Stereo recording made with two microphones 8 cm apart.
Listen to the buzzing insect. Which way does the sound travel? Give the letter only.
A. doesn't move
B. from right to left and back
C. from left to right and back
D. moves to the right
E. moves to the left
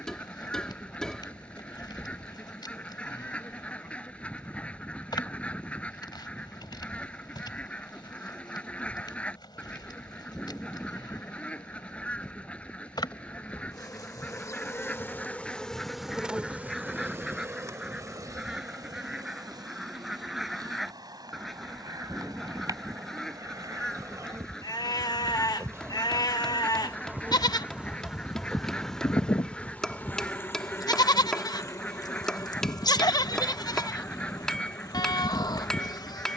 C.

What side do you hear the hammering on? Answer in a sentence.
You can hear the hammering in the centre.